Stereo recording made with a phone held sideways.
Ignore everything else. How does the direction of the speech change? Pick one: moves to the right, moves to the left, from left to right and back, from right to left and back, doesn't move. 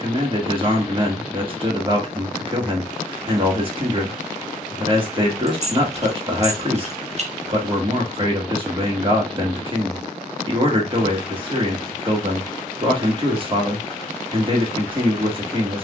doesn't move.